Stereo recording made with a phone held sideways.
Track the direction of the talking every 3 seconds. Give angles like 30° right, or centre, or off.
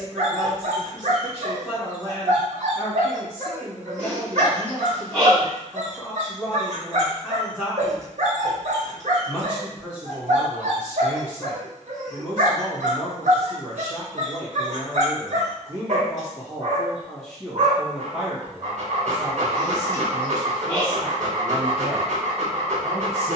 10° left, 10° left, 10° left, 10° left, 10° left, 10° left, 30° right, 50° right.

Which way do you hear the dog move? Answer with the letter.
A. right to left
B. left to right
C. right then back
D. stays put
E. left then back
D.